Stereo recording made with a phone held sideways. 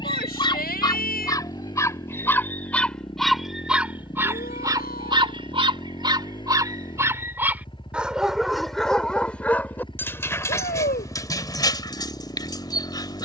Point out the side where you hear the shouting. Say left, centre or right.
left.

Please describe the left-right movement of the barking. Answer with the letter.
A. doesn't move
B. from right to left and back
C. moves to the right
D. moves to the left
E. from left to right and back
E.